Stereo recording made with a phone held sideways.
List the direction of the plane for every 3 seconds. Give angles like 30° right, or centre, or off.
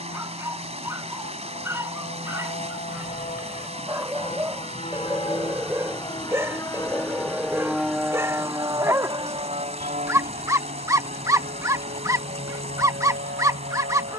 60° left, 40° left, centre, 50° right, 70° right.